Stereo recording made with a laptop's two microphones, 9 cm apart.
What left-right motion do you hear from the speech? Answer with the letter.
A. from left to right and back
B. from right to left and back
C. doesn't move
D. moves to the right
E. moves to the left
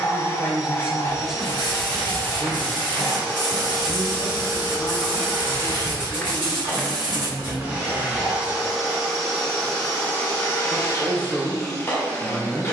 B.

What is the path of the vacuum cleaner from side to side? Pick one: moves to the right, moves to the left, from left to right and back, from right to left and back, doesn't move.
from left to right and back.